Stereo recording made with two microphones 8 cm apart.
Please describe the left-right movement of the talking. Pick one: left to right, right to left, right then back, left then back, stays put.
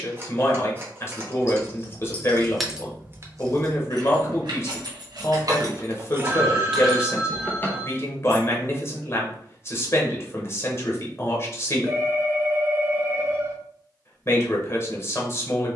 stays put.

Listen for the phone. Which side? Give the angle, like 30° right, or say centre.
30° right.